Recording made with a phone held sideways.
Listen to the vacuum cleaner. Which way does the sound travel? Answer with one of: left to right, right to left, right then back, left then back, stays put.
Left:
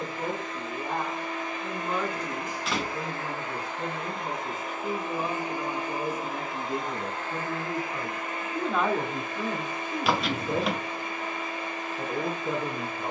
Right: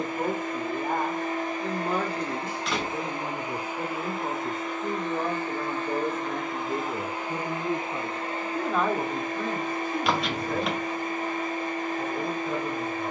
left then back.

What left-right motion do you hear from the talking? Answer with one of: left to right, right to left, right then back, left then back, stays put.
right to left.